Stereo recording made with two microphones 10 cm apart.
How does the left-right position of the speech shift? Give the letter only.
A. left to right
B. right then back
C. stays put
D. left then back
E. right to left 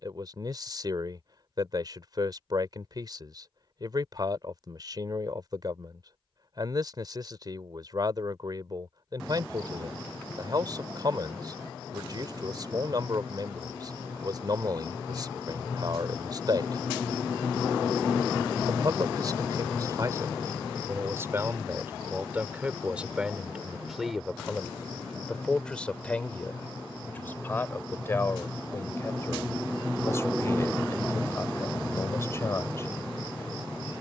E.